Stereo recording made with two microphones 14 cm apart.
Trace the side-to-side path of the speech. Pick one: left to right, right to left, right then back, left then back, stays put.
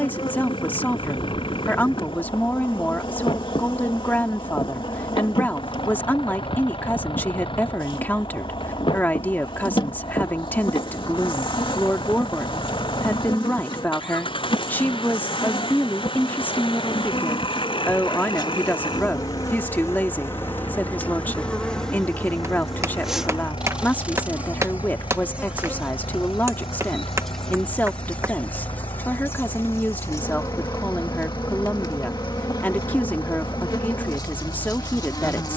stays put.